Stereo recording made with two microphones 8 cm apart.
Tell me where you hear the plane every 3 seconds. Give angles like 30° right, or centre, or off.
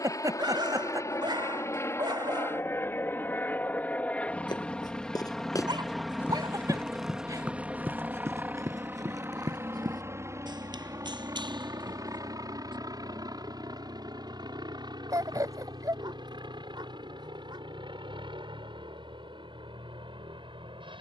40° left, 10° left, 10° right, 30° right, 50° right, 60° right, 60° right.